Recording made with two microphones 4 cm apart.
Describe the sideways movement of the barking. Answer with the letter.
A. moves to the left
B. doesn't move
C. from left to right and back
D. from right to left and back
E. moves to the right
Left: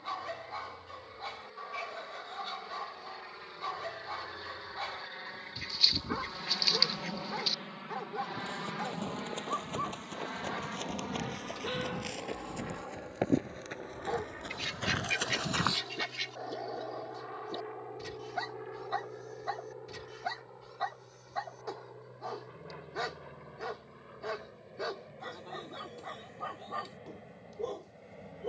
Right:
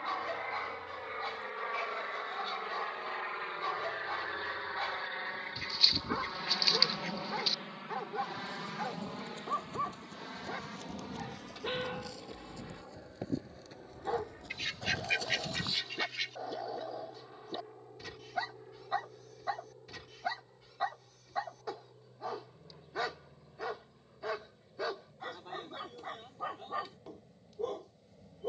B.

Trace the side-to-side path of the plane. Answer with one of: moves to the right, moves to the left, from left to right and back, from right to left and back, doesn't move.
moves to the left.